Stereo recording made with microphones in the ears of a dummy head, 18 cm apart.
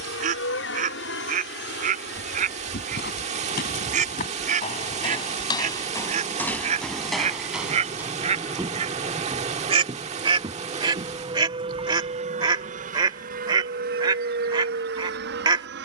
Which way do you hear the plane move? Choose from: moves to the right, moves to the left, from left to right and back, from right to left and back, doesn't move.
moves to the right.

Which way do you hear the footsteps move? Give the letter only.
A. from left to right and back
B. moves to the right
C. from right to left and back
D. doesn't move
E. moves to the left
B.